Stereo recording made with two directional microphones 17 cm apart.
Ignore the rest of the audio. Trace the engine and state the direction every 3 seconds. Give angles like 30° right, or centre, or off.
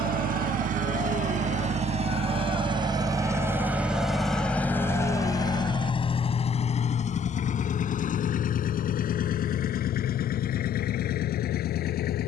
40° right, 10° left, 50° left, 60° left.